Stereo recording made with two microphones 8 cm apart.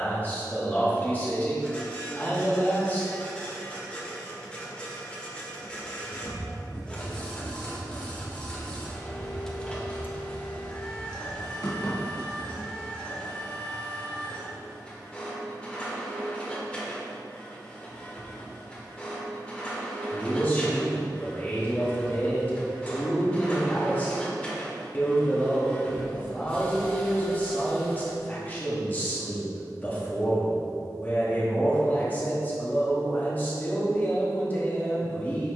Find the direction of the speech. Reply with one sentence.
You can hear the speech on the left.